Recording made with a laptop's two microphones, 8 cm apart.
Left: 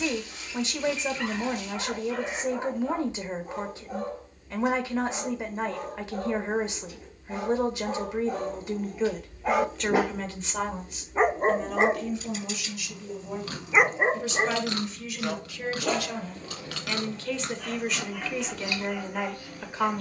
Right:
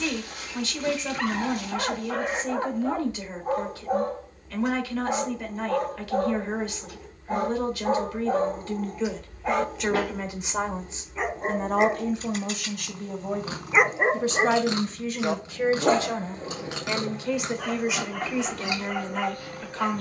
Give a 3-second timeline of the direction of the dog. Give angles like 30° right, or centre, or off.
60° right, 60° right, 40° right, 20° left, centre, 40° right, 50° right.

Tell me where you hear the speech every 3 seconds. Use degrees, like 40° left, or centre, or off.
20° left, 20° left, 20° left, 20° right, 50° right, 20° right, 10° left.